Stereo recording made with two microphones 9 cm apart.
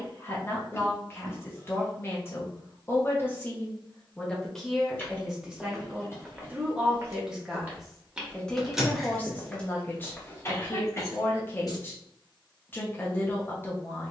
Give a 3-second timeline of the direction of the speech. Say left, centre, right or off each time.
left, centre, centre, left, left.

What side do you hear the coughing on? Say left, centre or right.
left.